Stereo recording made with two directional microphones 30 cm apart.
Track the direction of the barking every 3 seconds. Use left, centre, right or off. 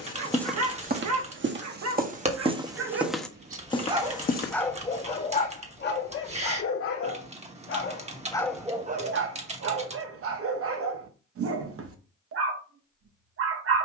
right, centre, left, right, right.